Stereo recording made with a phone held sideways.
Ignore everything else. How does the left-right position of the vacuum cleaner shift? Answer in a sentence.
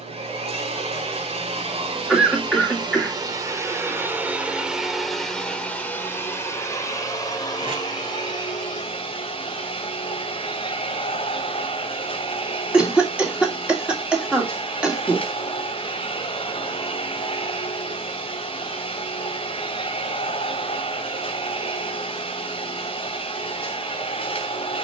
You can hear the vacuum cleaner go from the right side to the left.